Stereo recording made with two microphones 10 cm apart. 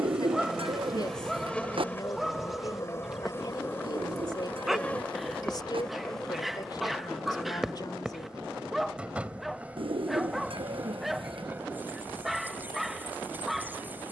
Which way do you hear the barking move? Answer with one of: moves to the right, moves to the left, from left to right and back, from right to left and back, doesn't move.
doesn't move.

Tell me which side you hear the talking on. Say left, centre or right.
left.